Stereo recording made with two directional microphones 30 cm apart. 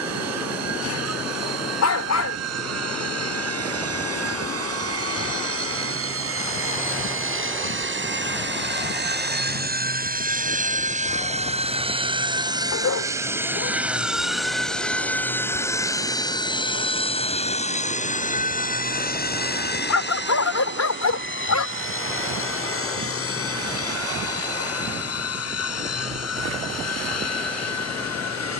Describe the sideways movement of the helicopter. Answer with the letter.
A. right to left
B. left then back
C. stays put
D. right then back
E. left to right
A.